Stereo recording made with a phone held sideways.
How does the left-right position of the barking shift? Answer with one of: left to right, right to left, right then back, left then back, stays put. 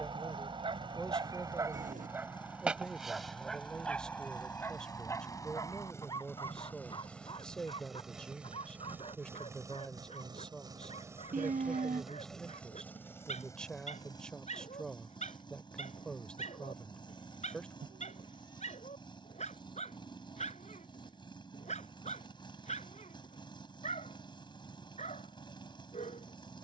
right to left.